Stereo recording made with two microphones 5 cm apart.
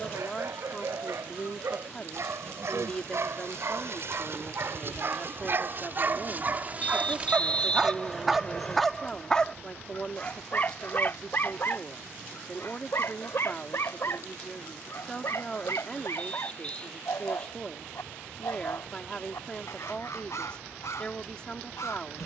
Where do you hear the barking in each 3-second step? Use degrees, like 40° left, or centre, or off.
70° right, 60° right, 20° right, 30° left, 60° left, 60° left, 70° left, 70° left.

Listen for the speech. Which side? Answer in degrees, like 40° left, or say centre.
20° left.